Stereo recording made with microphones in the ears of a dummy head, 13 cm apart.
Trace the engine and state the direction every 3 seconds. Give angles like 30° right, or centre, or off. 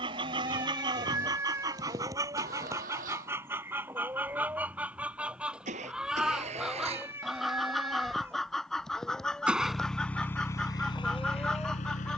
60° right, 60° right, 40° right, 20° left.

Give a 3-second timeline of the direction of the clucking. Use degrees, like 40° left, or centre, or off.
30° right, 10° right, centre, 10° left.